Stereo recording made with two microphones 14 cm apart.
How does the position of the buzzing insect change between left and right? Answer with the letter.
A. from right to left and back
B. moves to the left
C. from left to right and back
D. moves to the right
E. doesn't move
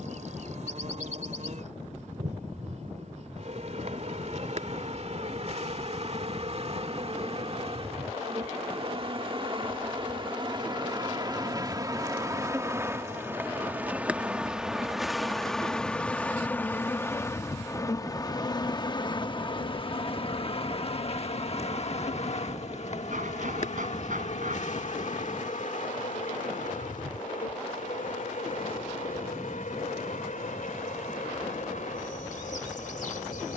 B.